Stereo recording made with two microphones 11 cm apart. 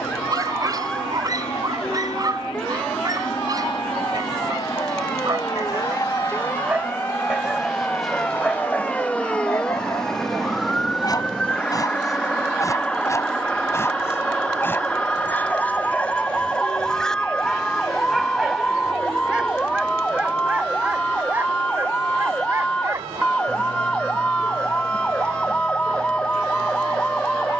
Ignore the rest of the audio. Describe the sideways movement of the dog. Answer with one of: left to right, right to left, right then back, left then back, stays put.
left then back.